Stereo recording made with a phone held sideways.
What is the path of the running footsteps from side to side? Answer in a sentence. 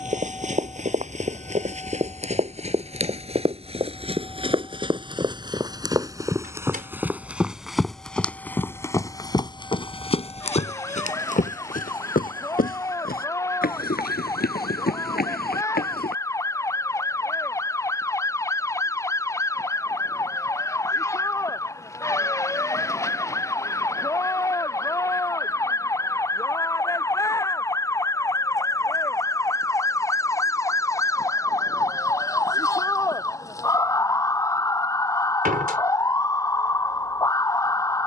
In this clip you hear the running footsteps travel towards the left.